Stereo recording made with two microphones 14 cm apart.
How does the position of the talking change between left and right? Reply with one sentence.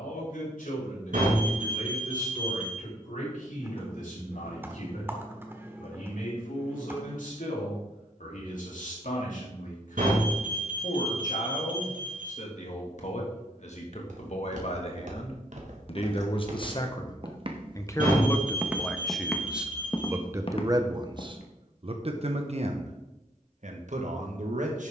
In this clip you hear the talking move from left to right.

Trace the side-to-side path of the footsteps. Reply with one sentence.
In this clip you hear the footsteps move from right to left.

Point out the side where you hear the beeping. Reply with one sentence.
You can hear the beeping on the right.